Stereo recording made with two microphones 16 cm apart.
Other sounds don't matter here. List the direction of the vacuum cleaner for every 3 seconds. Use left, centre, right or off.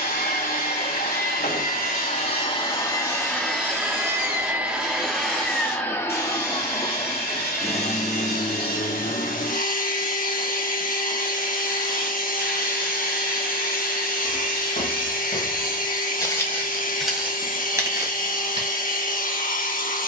left, centre, left, left, left, left, left.